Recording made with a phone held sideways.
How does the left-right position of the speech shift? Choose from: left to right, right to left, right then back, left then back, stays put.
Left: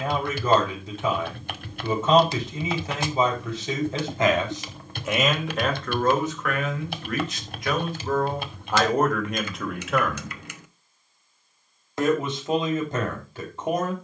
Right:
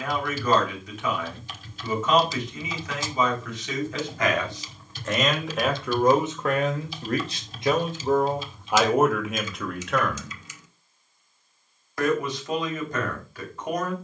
right then back.